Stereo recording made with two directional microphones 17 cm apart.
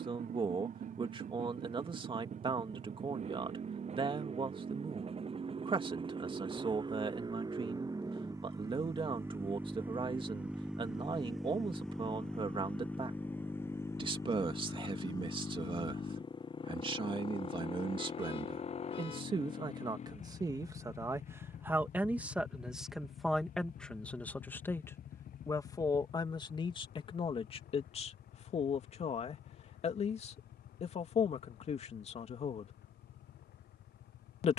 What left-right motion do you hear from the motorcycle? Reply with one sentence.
You can hear the motorcycle travel towards the left.